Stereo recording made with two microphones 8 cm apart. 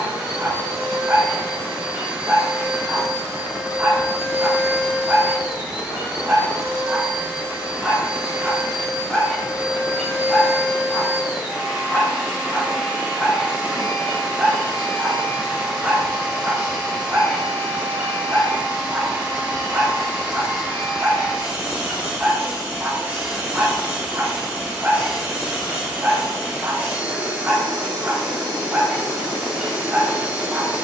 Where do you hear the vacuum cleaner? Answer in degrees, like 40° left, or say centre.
20° right.